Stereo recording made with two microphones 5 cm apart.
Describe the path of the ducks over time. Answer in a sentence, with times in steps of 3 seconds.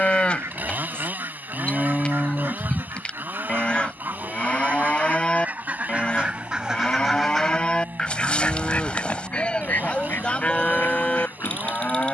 In this clip you hear the ducks on the right from 0 s, in the centre from 6 s and on the left from 9 s.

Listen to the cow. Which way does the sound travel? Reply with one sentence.
In this clip you hear the cow stay in one place.